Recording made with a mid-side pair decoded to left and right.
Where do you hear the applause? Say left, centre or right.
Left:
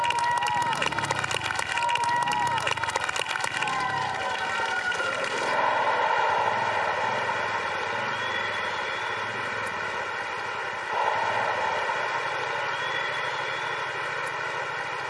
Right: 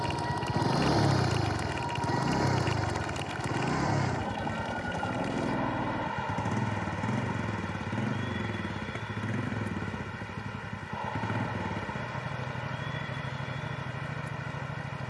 left.